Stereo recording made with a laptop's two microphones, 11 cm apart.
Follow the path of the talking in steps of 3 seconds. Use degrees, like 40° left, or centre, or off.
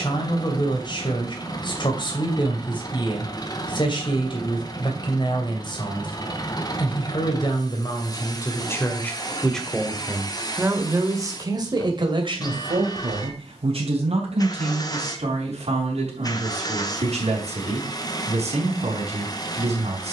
40° left, 40° left, 30° left, 10° right, 60° right, 70° right, 70° right.